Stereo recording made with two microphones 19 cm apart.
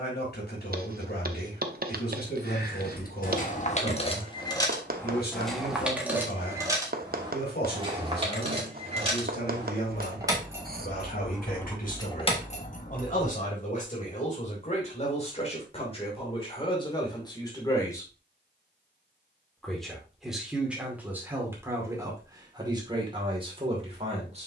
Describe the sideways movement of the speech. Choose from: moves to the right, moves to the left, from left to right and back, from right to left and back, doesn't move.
moves to the right.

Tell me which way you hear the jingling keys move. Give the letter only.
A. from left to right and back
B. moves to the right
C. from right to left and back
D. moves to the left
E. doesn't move
A.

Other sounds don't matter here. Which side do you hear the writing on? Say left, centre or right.
right.